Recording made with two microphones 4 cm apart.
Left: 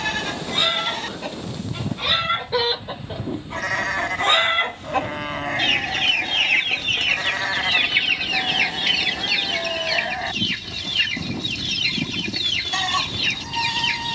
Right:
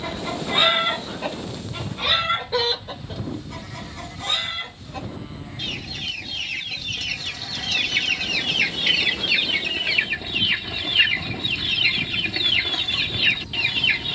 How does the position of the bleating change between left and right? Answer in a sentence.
You can hear the bleating stay put.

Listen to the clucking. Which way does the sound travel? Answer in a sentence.
You can hear the clucking go left and come back.